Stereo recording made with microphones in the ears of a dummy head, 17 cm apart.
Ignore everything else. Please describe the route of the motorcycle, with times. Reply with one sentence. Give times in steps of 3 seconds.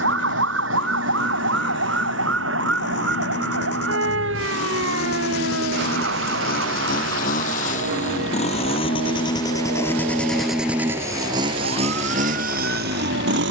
You can hear the motorcycle on the left from 0 s, in the centre from 9 s and on the right from 12 s.